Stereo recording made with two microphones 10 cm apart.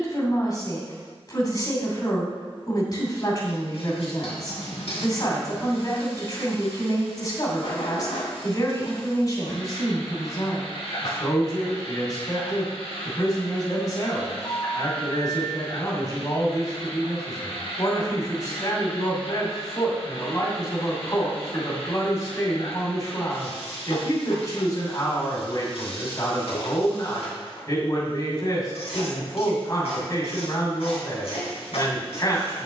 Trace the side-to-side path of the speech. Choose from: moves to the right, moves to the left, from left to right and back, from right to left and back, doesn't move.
doesn't move.